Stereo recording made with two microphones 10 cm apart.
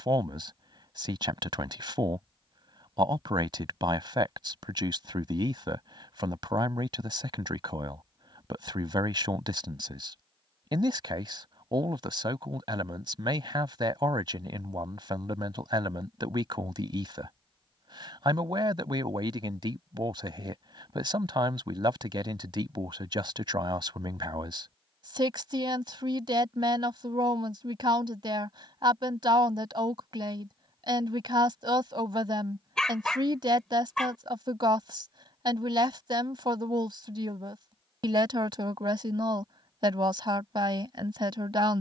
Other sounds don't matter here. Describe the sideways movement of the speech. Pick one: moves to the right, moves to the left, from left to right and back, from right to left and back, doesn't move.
doesn't move.